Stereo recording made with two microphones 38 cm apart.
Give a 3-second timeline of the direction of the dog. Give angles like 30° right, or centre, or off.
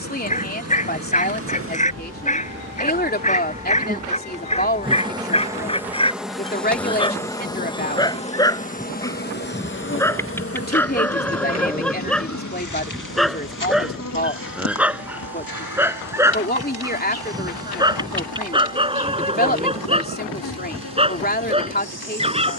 20° left, 20° left, 10° left, 10° left, centre, 10° right, 10° right, 10° right.